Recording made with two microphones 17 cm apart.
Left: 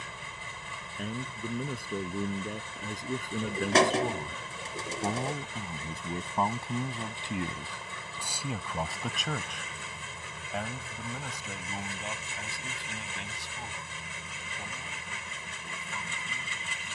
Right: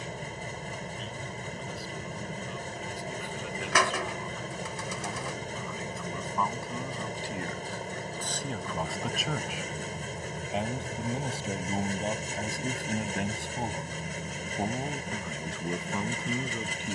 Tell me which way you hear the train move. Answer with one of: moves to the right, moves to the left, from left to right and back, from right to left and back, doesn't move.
doesn't move.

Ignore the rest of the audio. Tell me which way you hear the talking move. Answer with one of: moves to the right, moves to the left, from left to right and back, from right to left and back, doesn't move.
moves to the right.